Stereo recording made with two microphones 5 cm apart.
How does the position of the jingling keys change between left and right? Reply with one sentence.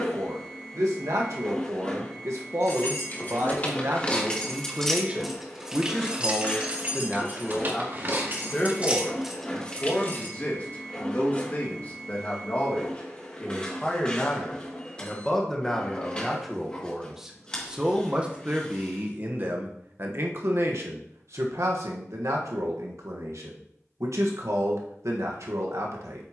In this clip you hear the jingling keys move from left to right and back again.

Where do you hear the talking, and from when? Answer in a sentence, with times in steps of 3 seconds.
You can hear the talking on the right from 0 s, in the centre from 6 s, on the left from 9 s, in the centre from 15 s and on the right from 18 s.